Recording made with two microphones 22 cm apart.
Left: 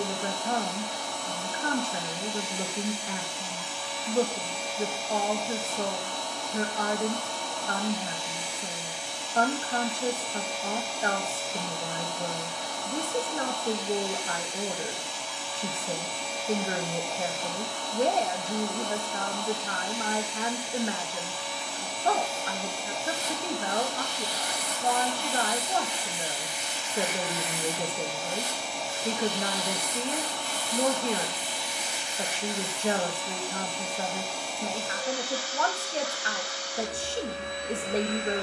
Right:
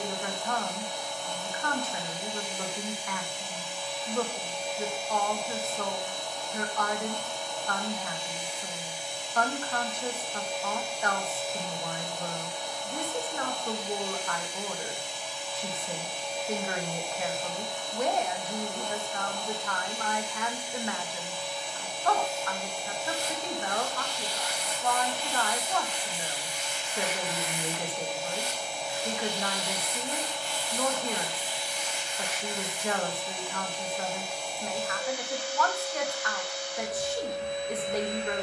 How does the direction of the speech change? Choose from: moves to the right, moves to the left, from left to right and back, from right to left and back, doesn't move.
doesn't move.